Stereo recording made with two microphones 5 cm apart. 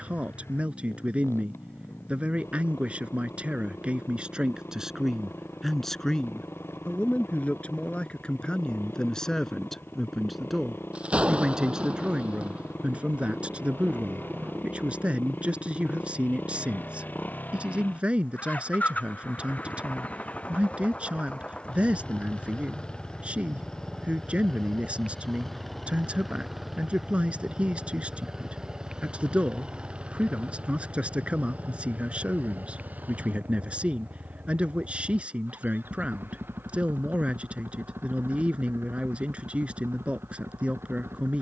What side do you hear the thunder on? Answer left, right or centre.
right.